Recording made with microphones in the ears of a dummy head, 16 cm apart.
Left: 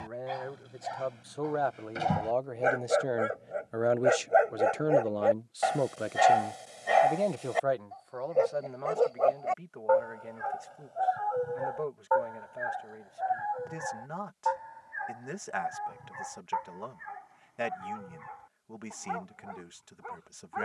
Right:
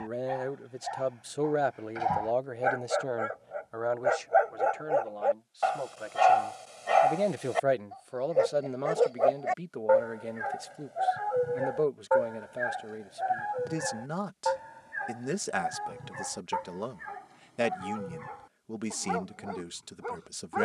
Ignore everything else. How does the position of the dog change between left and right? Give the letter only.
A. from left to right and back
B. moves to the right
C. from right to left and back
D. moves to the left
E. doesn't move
B.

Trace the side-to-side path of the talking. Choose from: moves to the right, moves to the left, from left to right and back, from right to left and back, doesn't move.
from right to left and back.